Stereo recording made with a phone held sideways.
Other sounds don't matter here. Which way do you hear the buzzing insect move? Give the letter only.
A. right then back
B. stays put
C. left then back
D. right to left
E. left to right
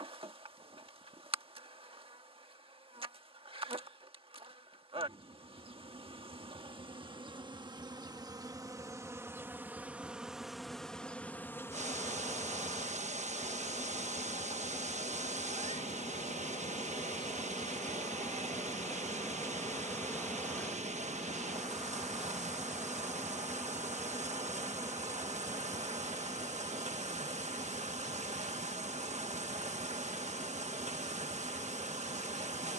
C.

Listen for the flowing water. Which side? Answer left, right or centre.
right.